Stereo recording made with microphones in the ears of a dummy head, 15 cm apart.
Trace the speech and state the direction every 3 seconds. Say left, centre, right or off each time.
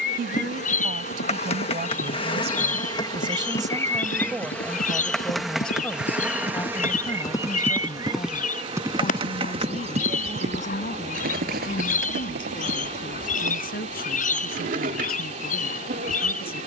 right, centre, left, left, left, left.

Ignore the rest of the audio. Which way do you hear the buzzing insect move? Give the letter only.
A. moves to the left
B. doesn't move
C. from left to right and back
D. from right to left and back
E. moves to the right
E.